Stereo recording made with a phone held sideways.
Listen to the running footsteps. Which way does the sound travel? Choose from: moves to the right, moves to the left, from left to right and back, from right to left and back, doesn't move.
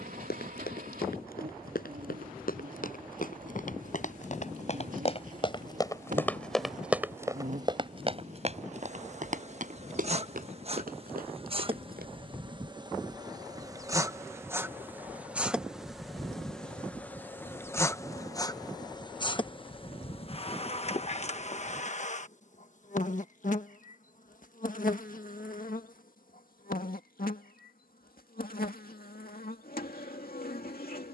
moves to the right.